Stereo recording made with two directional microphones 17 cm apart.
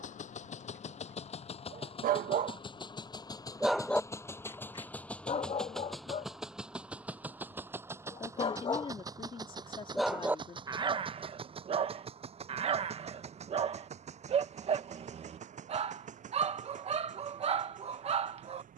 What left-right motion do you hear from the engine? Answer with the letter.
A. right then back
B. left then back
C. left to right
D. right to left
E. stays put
C.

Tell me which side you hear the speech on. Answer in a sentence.
You can hear the speech on the left.